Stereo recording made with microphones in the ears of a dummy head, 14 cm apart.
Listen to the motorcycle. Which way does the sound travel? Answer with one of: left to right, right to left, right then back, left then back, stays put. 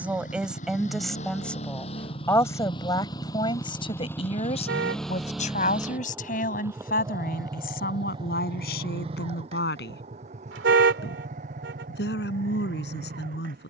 left to right.